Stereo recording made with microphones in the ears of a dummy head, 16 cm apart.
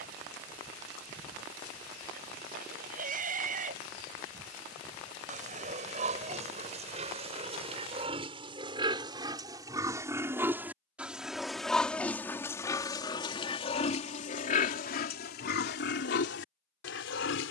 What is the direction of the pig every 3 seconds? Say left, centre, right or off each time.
right, right, right, centre, left, left.